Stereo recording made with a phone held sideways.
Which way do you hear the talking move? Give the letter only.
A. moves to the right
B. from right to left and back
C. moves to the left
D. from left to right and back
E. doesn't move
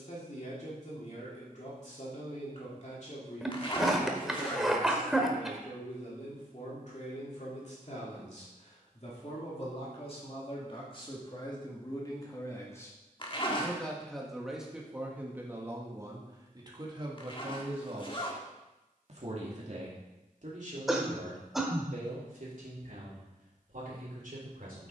A.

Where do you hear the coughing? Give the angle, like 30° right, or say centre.
centre.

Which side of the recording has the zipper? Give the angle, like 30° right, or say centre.
40° left.